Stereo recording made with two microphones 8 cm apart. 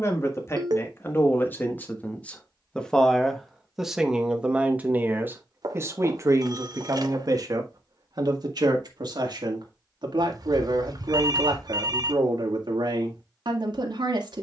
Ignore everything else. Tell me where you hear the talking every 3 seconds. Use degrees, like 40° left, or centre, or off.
30° left, 10° right, 50° right, 70° right, 70° right.